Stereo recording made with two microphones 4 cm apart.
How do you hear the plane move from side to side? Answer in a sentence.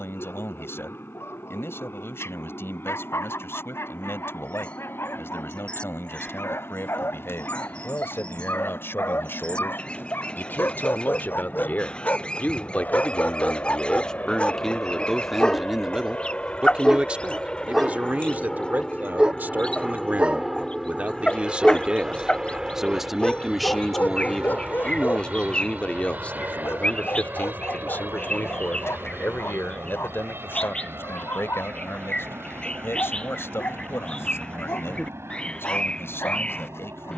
You can hear the plane move to the right.